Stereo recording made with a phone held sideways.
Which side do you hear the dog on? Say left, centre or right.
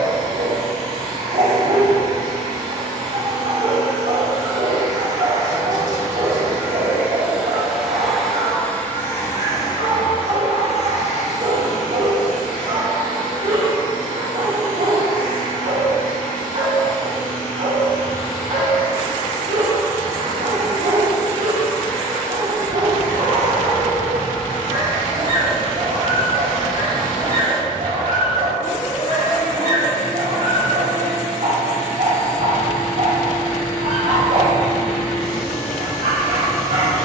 right.